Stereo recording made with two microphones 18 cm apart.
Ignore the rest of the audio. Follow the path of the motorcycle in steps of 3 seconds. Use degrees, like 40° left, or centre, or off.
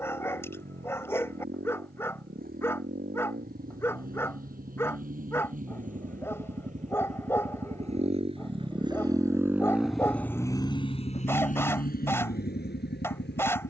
60° right, 60° right, 40° right, 20° left, 70° left.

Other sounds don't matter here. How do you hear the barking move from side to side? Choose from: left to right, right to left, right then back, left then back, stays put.
stays put.